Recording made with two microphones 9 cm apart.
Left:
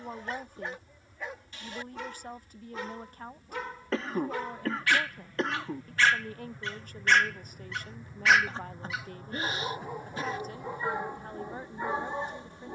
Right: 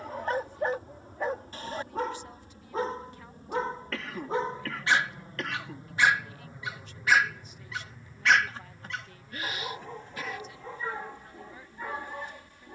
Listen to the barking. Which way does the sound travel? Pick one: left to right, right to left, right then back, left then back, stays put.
right to left.